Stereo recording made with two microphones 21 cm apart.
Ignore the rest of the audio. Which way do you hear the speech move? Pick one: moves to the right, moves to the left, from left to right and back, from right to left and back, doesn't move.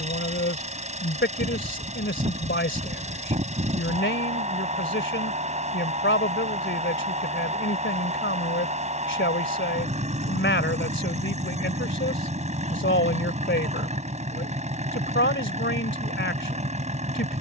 doesn't move.